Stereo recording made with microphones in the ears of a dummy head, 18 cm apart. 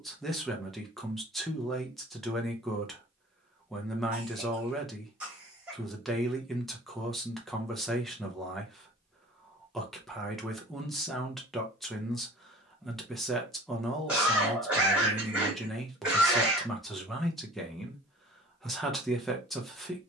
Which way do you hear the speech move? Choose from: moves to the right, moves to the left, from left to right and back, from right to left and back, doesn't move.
doesn't move.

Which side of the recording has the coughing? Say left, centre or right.
centre.